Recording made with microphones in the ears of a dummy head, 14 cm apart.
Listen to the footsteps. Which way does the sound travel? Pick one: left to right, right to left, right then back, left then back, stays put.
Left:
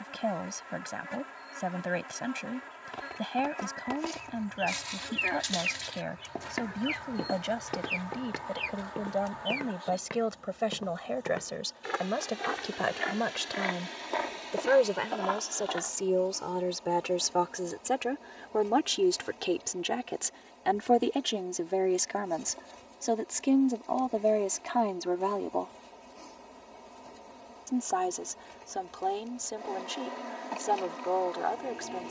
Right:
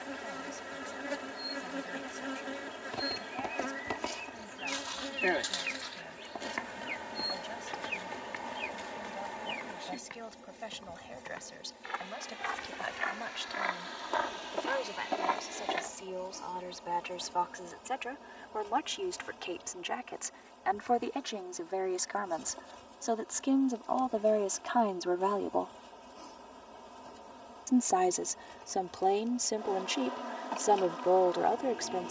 left then back.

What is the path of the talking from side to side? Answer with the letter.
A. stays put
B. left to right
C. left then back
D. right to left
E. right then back
B.